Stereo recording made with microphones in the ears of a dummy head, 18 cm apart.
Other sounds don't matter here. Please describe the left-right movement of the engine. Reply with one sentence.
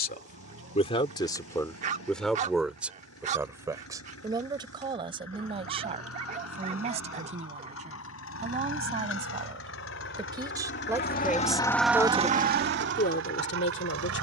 In this clip you hear the engine move to the right.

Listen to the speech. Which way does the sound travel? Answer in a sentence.
In this clip you hear the speech go right and come back.